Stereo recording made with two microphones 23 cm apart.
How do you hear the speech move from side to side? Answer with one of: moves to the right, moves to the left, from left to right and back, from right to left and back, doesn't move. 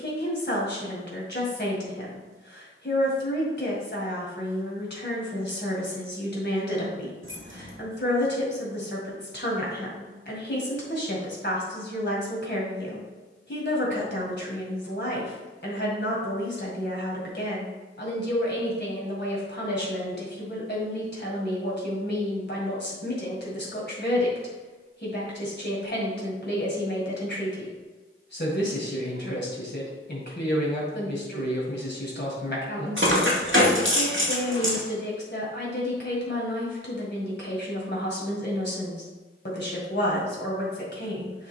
doesn't move.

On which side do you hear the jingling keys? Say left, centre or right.
right.